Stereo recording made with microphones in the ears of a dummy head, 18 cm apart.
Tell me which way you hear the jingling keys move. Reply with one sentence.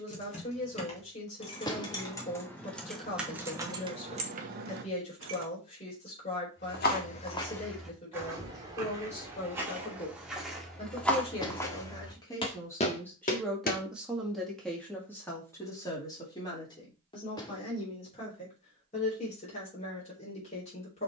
In this clip you hear the jingling keys move to the right.